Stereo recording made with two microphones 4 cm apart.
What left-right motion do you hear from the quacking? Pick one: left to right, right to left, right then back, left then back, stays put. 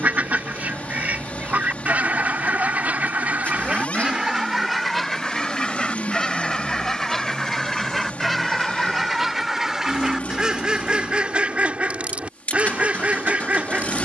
left then back.